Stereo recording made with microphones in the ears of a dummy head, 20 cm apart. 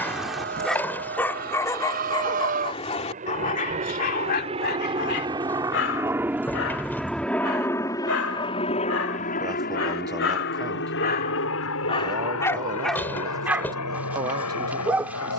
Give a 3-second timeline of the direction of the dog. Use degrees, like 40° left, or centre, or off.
10° left, 40° left, 60° left, 50° left, centre.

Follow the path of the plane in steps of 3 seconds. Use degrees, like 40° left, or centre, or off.
50° right, 30° right, 10° left, 50° left, 70° left.